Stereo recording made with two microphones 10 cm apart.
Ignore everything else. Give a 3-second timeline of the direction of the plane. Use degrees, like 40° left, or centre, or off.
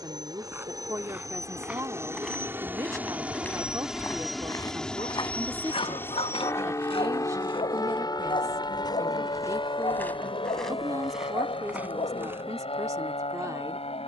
30° right, centre, 30° left, 50° left, 60° left.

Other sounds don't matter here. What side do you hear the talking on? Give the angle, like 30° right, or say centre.
30° right.